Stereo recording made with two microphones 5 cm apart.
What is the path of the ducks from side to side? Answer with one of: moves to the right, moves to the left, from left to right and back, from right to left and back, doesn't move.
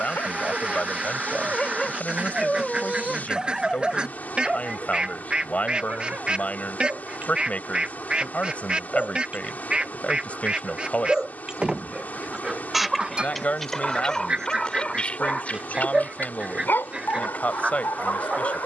doesn't move.